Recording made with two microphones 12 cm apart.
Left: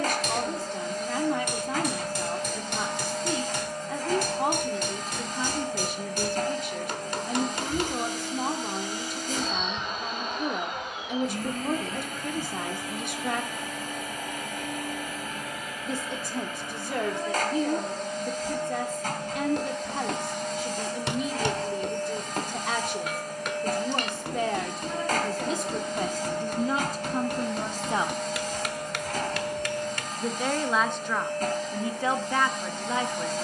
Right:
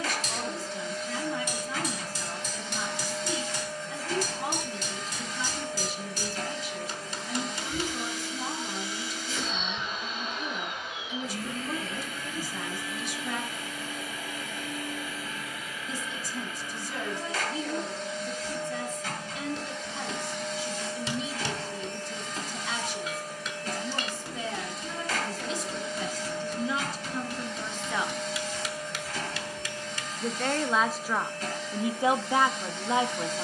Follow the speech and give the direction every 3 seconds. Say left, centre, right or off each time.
left, left, left, left, left, left, left, left, left, left, centre.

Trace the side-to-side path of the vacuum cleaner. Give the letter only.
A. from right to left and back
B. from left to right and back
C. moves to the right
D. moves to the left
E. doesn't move
E.